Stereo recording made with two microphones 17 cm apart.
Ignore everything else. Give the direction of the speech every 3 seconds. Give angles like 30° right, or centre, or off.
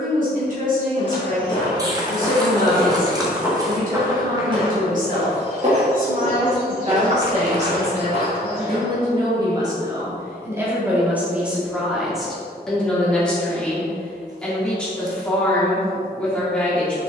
50° right, 50° right, 40° right, 10° right, 10° left, 10° left.